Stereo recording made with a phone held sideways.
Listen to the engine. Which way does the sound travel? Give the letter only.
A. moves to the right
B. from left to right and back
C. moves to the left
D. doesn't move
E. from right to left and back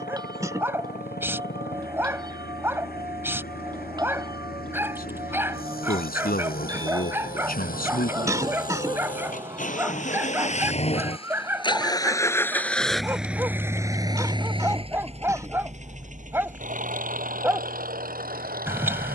A.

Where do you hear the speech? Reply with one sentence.
You can hear the speech on the left.